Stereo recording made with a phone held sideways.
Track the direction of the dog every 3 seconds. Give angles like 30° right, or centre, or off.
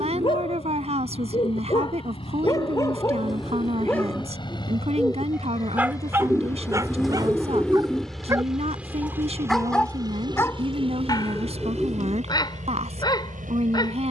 40° left, centre, 20° right, 20° left, 30° left.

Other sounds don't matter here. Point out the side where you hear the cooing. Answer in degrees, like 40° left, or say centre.
centre.